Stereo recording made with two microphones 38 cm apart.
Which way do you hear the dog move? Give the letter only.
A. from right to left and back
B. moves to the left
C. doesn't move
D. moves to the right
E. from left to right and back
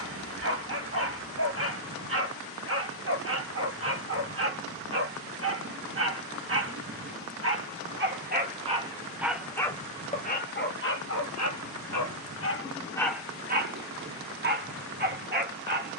A.